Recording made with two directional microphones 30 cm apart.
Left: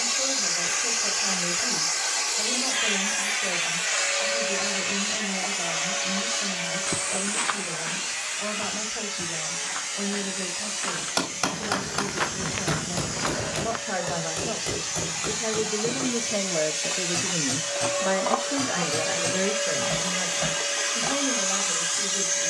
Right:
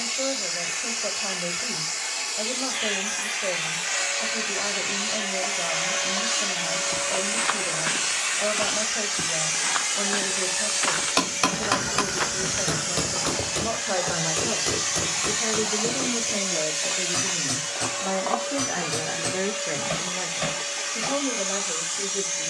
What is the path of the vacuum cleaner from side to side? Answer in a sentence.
In this clip you hear the vacuum cleaner move from left to right and back again.